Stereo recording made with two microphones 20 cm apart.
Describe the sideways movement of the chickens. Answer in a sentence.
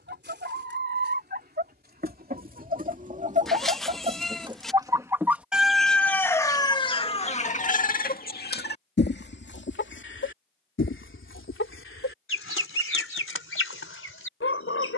You can hear the chickens move to the left.